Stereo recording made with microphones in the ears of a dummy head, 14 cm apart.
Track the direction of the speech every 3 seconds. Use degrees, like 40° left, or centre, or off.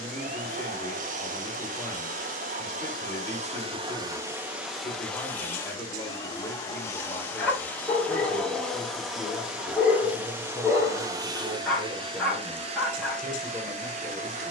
20° left, 20° left, 10° left, 10° right, 20° right.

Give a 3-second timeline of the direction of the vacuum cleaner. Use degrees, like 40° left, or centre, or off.
50° right, 10° right, 10° left, 20° right, 40° right.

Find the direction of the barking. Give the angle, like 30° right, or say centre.
centre.